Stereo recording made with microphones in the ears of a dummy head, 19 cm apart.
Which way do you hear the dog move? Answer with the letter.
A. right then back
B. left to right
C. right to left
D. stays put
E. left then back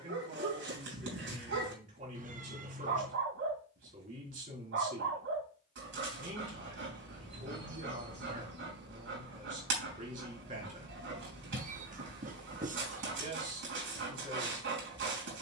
D.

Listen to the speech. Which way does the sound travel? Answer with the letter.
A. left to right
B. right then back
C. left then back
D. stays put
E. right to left
D.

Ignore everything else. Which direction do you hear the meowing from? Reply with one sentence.
In this clip you hear the meowing on the right.